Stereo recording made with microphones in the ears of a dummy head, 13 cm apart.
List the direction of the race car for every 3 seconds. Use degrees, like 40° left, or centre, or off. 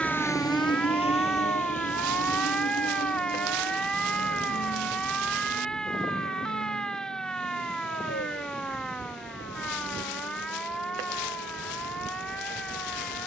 50° left, 70° left, 80° left, 80° left, 80° left.